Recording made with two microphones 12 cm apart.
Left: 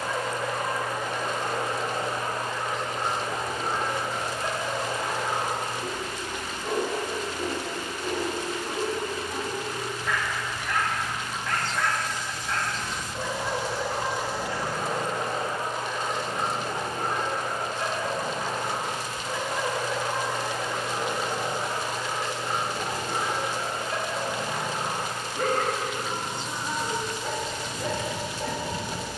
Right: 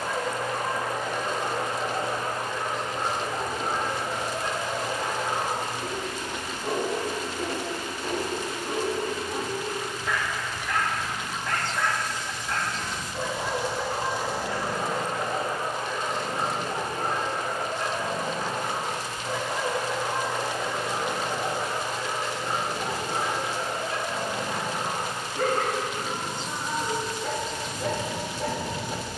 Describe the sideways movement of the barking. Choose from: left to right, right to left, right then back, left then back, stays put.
stays put.